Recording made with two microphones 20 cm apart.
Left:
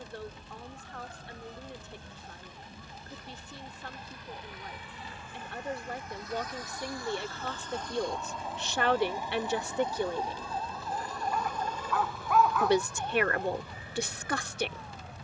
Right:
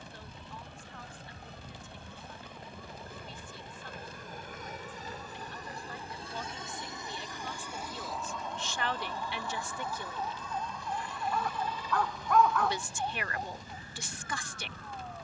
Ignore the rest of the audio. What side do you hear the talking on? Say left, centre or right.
left.